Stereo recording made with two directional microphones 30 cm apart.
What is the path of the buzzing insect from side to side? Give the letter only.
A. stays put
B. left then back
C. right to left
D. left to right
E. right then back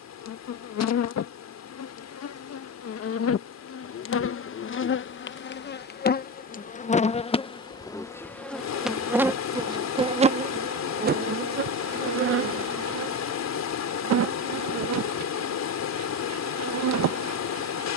D.